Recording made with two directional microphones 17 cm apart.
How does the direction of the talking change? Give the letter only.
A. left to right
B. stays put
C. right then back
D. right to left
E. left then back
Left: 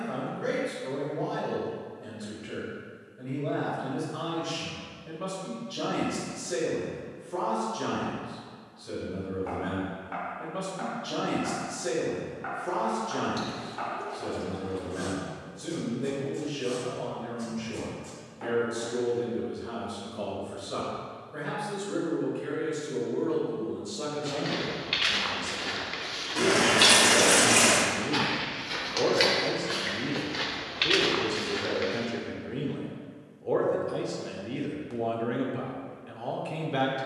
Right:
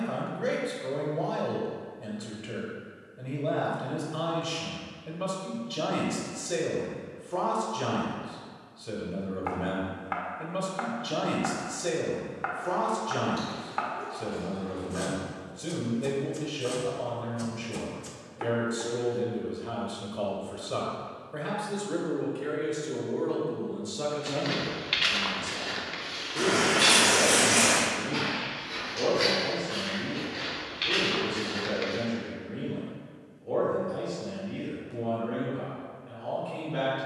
D.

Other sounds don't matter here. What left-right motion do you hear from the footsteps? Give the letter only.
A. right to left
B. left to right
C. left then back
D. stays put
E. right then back
C.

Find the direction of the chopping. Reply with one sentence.
In this clip you hear the chopping on the right.